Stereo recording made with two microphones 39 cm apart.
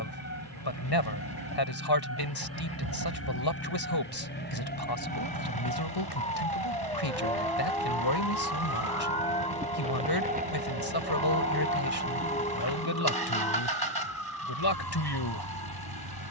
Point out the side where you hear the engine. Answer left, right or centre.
right.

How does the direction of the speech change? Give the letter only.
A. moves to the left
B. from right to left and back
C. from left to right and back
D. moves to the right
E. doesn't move
E.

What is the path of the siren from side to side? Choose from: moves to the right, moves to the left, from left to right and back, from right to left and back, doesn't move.
moves to the right.